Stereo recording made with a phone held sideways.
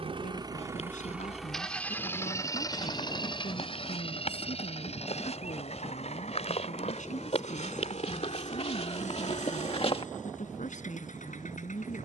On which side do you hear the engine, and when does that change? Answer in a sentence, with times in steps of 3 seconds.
In this clip you hear the engine in the centre from 0 s and on the left from 3 s.